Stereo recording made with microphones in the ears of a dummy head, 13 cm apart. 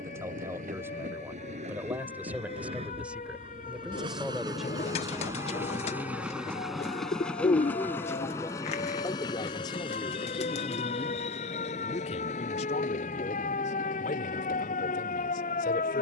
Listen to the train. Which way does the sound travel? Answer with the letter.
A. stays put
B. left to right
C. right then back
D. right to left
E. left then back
D.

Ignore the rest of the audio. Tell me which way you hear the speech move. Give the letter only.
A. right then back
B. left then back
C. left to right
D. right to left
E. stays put
D.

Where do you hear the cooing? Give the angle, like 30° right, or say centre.
50° left.